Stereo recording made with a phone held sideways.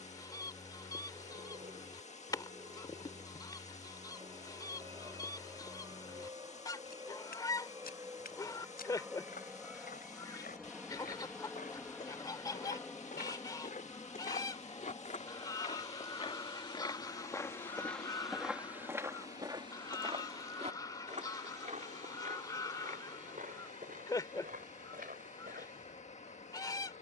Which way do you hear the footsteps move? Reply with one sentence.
In this clip you hear the footsteps move from left to right.